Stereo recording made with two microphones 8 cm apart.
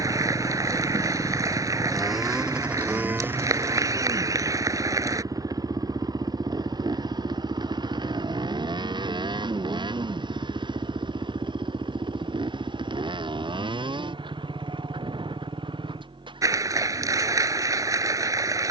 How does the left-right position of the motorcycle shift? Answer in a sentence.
You can hear the motorcycle go from the left side to the right.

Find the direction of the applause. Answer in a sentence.
In this clip you hear the applause on the right.